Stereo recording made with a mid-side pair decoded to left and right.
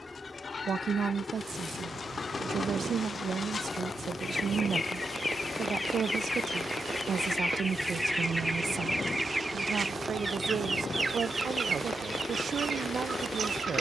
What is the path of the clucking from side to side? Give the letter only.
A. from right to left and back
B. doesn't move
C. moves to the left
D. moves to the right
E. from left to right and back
D.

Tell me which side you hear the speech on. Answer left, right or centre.
right.